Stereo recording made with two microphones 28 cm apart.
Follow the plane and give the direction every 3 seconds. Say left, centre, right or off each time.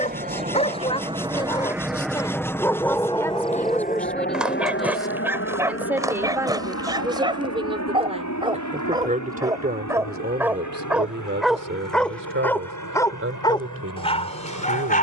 centre, left, left, left, left.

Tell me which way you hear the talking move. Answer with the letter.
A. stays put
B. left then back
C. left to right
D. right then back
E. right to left
C.